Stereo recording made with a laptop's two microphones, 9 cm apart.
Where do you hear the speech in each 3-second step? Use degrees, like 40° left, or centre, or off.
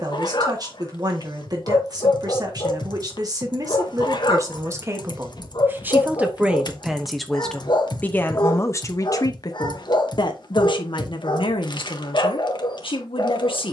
40° right, 30° right, 10° left, 60° left, 70° left.